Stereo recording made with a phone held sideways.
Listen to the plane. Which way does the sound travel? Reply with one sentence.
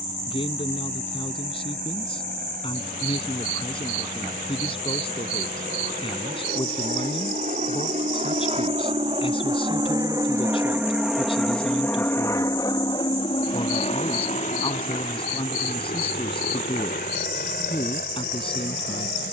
You can hear the plane travel towards the left.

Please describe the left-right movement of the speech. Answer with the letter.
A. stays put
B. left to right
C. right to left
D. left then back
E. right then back
A.